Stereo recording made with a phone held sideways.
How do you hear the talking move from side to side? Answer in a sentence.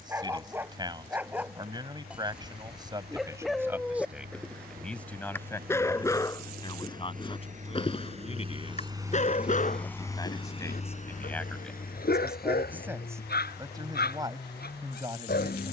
You can hear the talking go left and come back.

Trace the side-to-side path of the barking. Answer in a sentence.
In this clip you hear the barking travel towards the left.